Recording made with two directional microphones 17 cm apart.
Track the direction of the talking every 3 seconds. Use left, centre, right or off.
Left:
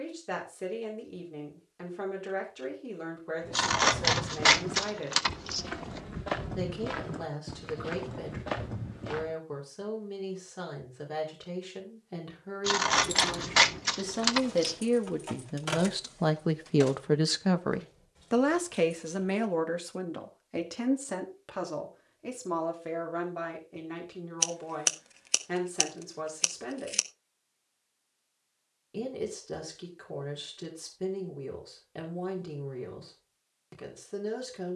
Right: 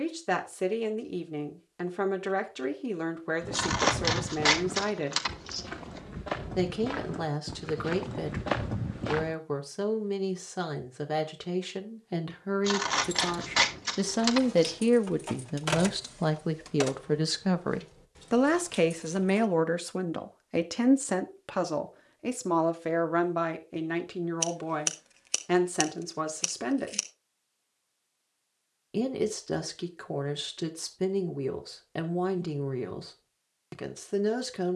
right, right, right, right, right, centre, right, right, right, right, right, right.